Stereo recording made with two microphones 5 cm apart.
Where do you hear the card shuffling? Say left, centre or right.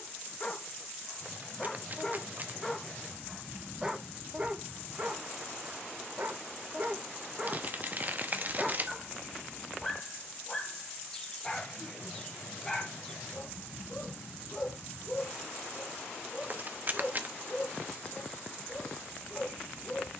right.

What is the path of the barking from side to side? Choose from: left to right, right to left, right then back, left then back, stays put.
right then back.